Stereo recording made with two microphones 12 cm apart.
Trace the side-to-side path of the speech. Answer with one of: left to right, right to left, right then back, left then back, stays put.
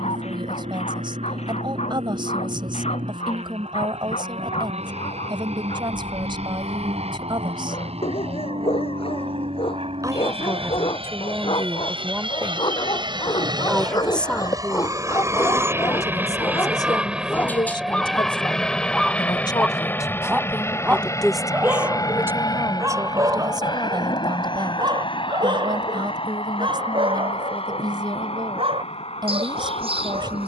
left then back.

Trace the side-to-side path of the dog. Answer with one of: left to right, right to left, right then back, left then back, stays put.
left to right.